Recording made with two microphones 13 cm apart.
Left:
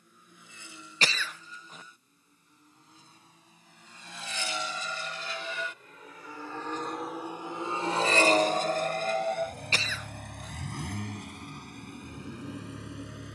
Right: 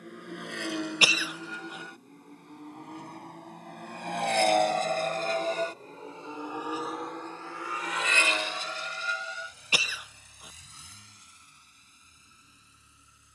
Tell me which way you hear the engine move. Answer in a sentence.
In this clip you hear the engine move from right to left.